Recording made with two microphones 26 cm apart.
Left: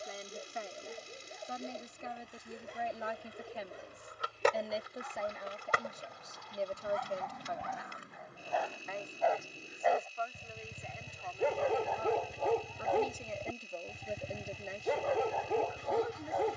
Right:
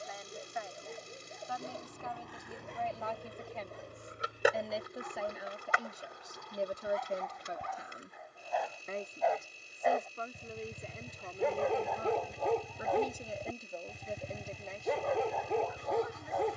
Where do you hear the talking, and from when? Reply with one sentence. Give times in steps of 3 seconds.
You can hear the talking on the left from 0 s, in the centre from 3 s, on the right from 6 s, in the centre from 12 s and on the left from 15 s.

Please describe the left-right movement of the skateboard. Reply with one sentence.
You can hear the skateboard travel towards the left.